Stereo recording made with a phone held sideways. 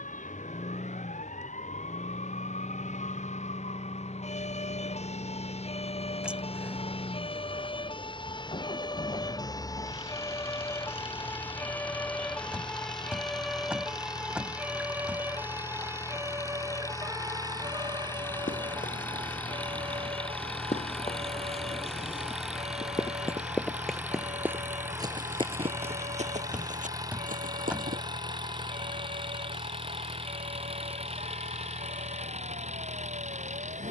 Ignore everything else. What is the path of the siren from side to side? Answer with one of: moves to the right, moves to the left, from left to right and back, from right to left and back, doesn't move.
moves to the right.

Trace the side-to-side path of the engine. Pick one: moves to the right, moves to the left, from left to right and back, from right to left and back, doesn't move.
moves to the right.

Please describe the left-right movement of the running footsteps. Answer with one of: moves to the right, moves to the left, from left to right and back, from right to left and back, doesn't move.
moves to the right.